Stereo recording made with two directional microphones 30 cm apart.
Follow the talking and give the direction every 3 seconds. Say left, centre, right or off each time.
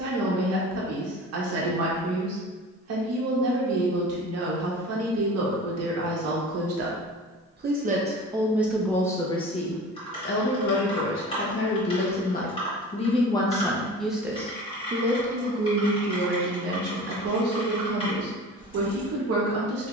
right, right, right, left, centre, right, right.